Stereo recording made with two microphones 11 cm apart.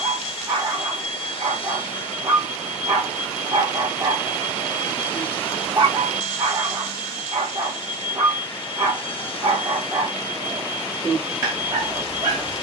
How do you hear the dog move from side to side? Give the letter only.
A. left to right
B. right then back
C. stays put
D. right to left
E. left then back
C.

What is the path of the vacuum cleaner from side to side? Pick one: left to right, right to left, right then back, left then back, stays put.
stays put.